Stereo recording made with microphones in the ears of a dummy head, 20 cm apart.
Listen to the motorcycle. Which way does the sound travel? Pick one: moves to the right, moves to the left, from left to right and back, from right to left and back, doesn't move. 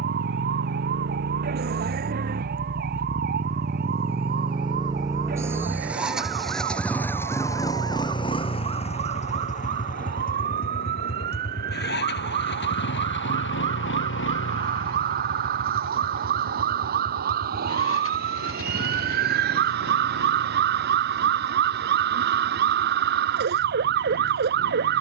moves to the left.